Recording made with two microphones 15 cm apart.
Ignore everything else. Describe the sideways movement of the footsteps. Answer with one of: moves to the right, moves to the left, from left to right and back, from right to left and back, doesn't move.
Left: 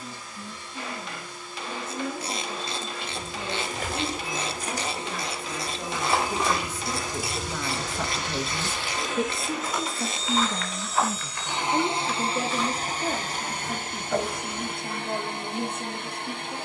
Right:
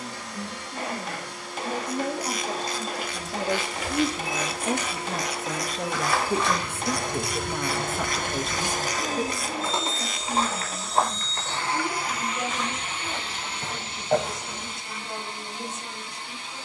moves to the right.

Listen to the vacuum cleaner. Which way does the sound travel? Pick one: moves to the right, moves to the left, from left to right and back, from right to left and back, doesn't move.
moves to the left.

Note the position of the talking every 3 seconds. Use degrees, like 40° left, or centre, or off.
70° right, 50° right, 20° right, 30° left, 50° left, 60° left.